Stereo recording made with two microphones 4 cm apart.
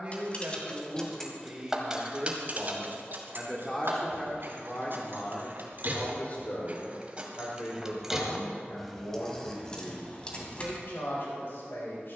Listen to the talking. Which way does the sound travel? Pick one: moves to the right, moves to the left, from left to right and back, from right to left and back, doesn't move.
moves to the left.